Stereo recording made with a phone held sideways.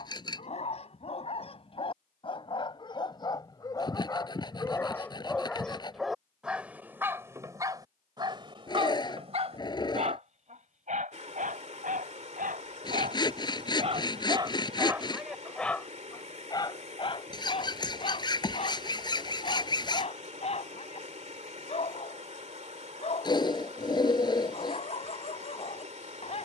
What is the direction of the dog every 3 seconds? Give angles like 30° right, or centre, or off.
40° left, 20° left, 20° right, 50° right, 40° right, 20° left, 40° left, 40° left, 40° left.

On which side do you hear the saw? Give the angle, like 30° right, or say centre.
30° left.